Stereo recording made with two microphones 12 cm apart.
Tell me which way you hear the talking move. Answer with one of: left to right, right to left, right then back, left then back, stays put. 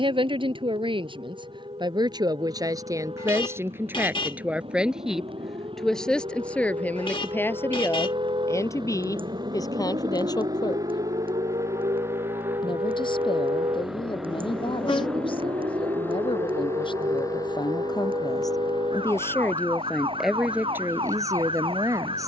left then back.